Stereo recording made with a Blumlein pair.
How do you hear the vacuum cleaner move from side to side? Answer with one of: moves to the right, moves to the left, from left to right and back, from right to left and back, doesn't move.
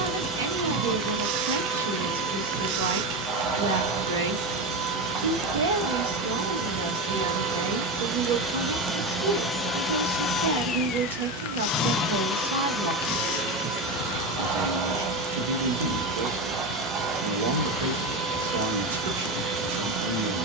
from right to left and back.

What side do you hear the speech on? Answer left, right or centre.
right.